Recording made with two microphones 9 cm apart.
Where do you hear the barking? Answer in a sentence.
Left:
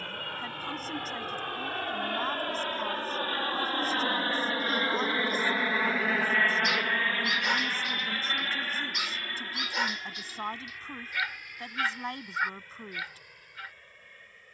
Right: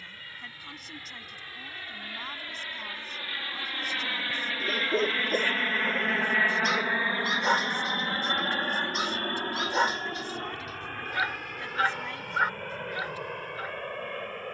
In this clip you hear the barking on the right.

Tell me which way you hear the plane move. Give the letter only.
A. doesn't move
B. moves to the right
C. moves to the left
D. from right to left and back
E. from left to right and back
B.